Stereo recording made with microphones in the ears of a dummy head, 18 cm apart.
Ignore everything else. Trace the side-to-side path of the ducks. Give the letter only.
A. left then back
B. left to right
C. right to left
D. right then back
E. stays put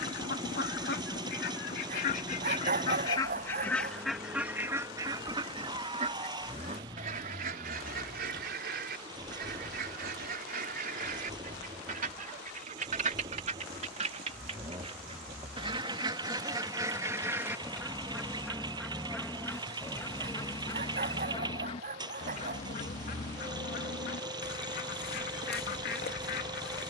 D.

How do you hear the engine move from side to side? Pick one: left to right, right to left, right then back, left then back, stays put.
stays put.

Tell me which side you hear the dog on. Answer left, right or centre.
right.